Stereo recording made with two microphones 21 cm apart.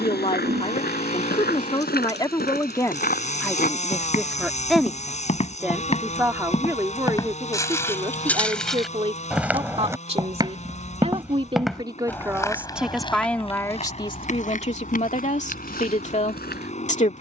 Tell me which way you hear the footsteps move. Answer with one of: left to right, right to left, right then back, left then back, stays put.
right then back.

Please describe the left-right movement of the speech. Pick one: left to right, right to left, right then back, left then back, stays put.
right then back.